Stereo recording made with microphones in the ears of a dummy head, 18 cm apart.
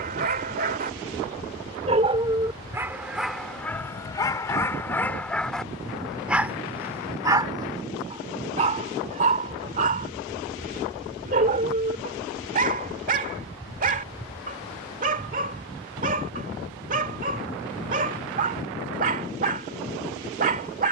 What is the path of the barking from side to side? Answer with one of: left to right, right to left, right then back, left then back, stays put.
left then back.